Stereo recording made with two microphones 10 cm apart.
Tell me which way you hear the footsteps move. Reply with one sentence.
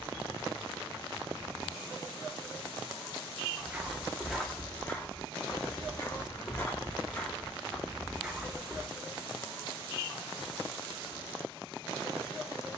In this clip you hear the footsteps move from right to left and back again.